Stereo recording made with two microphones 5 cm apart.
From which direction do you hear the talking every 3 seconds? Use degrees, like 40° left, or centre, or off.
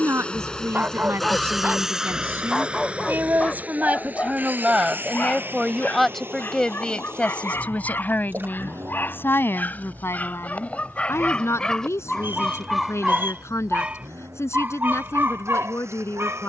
50° right, 20° right, 20° left, 50° left, 60° left, 60° left.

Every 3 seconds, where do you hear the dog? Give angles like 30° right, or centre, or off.
20° right, 30° left, 40° left, 30° left, 10° right, 50° right.